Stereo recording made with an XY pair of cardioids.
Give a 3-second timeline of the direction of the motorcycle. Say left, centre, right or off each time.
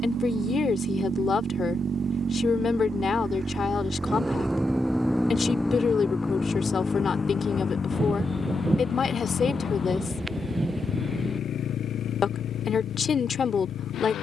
right, centre, left, left, left.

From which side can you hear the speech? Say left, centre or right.
left.